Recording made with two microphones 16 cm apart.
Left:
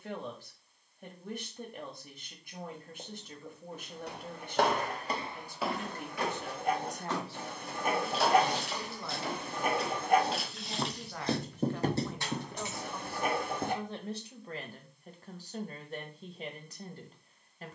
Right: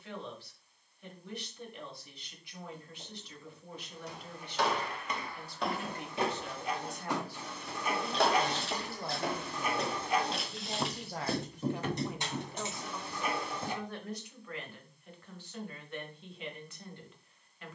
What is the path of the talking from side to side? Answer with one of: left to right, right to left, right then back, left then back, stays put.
right then back.